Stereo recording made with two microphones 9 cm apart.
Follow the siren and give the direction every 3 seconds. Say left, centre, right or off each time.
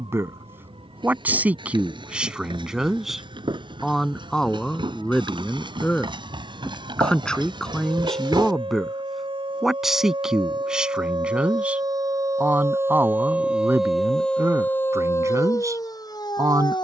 right, right, right, right, centre, left.